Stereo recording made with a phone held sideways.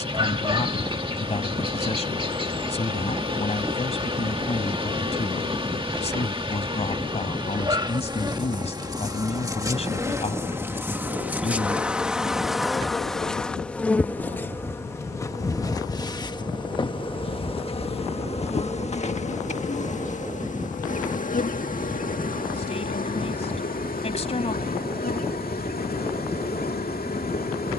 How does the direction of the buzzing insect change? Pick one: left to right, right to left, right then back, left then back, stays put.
right to left.